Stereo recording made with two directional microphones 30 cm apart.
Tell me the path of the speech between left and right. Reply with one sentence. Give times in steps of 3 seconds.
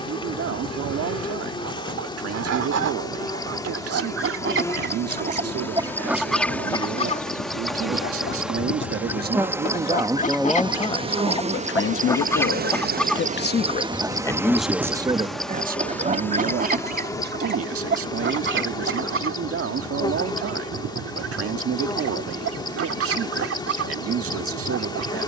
In this clip you hear the speech on the right from 0 s, in the centre from 9 s, on the left from 12 s and on the right from 15 s.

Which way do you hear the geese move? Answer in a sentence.
In this clip you hear the geese go left and come back.